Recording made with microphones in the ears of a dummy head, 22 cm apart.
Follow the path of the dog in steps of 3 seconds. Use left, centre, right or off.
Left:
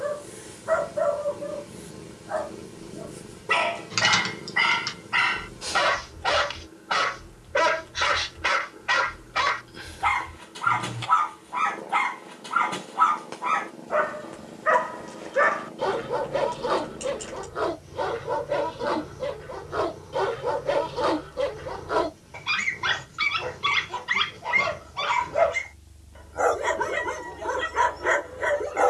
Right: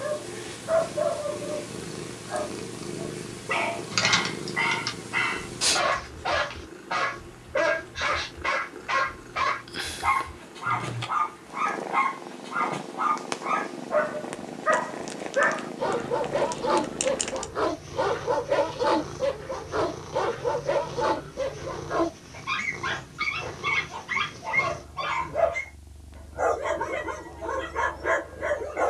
left, left, left, left, left, centre, centre, left, left, left.